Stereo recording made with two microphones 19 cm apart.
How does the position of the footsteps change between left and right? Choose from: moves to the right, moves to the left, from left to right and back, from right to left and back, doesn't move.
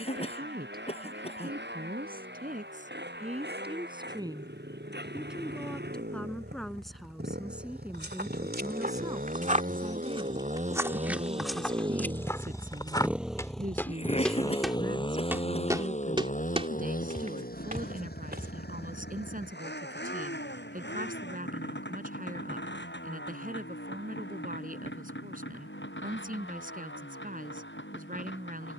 from right to left and back.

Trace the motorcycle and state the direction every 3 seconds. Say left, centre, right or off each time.
right, right, right, right, centre, left, left, left, left, left.